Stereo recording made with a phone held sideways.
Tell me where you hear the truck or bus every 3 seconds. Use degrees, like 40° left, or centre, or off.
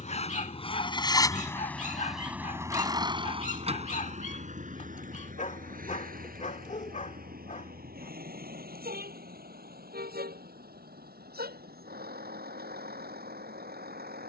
10° left, 50° right, 70° right, 80° right, 80° right.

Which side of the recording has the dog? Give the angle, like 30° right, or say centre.
50° left.